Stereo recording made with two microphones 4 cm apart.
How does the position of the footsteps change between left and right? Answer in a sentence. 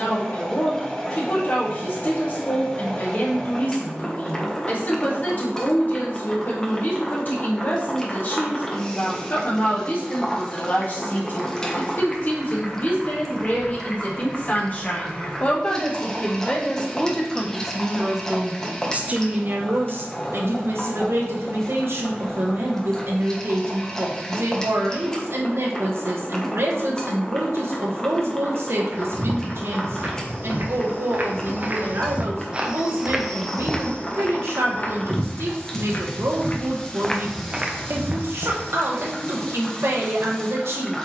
In this clip you hear the footsteps go left and come back.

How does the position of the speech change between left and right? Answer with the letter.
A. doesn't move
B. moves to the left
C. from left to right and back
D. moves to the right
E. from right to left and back
D.